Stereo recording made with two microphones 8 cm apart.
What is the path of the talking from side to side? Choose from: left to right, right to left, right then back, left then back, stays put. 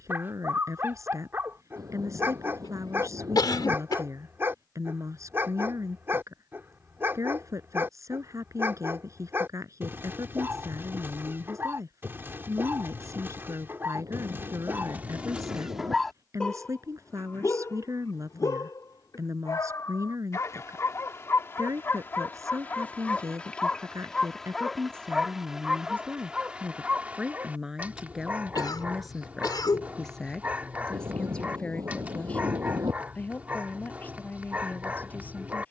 right to left.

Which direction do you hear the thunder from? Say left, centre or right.
right.